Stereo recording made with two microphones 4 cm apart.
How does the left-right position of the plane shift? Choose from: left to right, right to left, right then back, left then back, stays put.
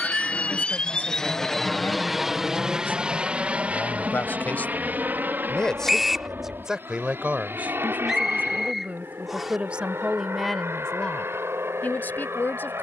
left to right.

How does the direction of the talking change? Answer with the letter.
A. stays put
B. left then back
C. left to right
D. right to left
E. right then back
E.